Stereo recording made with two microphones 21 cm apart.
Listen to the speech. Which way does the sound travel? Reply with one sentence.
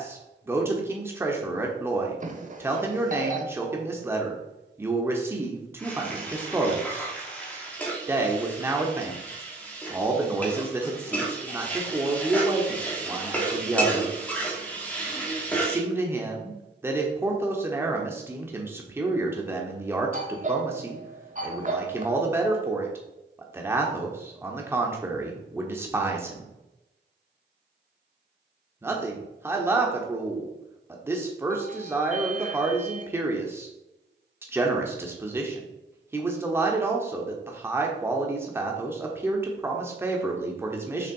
In this clip you hear the speech stay in one place.